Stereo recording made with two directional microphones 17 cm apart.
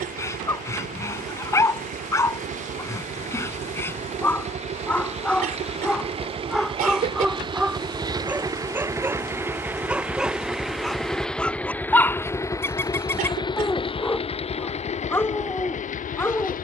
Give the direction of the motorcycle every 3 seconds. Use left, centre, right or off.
right, right, right, centre, left, left.